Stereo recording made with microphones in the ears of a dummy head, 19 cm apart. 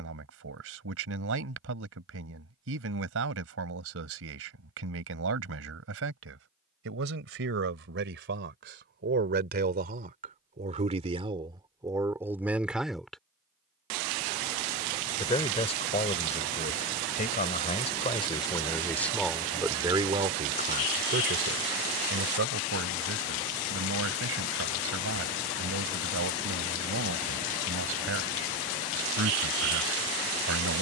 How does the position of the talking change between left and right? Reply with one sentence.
You can hear the talking move from right to left and back again.